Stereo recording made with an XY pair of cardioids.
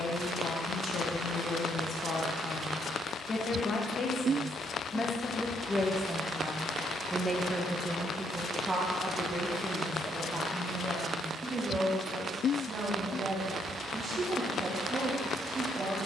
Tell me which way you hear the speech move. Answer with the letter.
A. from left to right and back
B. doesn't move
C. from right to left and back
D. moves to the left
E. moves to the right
E.